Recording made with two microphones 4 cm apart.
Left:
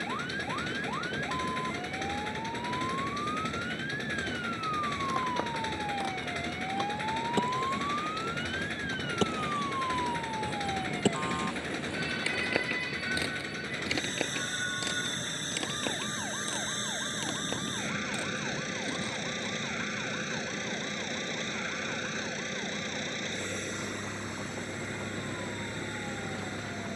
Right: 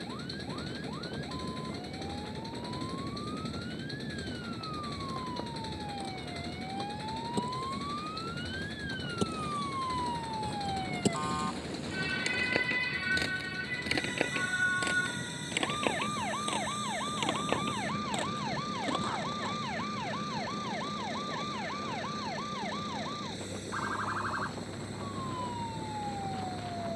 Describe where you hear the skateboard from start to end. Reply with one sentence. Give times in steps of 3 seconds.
In this clip you hear the skateboard not at all from 0 s, on the left from 3 s, in the centre from 12 s, on the right from 15 s and not at all from 21 s.